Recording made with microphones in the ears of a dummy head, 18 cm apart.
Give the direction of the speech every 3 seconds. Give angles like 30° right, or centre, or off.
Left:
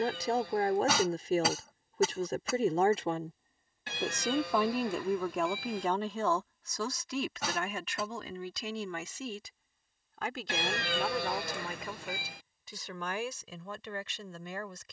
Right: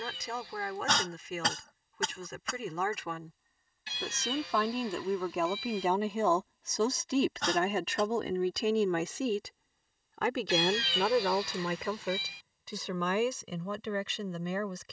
30° left, 10° left, 30° right, 60° right, 70° right.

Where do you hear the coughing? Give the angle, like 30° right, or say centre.
10° left.